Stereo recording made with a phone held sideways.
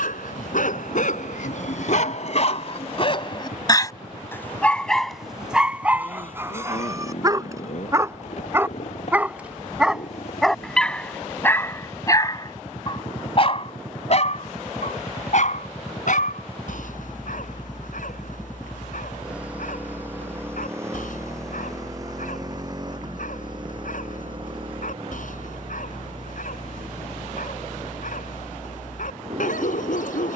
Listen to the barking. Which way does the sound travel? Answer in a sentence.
In this clip you hear the barking go right and come back.